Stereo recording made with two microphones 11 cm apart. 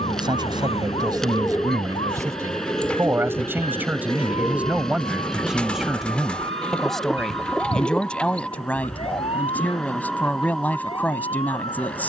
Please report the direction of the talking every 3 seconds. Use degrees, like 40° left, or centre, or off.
30° right, 10° right, 10° left, 10° left.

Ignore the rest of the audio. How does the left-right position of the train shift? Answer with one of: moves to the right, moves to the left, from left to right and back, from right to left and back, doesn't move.
doesn't move.